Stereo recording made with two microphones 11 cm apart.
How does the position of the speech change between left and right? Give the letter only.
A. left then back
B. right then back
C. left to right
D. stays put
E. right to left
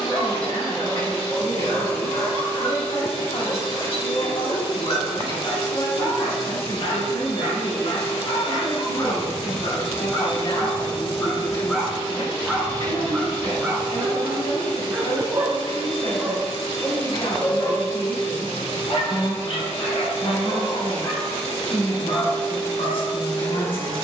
D.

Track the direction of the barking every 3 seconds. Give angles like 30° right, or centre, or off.
70° left, 70° left, 60° left, 30° left, 10° right, centre, 60° left, 70° left.